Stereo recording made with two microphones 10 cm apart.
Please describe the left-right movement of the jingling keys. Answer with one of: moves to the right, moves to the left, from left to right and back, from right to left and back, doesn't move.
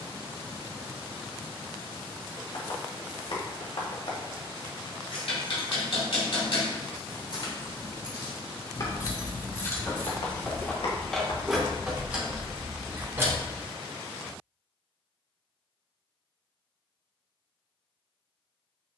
moves to the right.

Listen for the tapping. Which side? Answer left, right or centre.
left.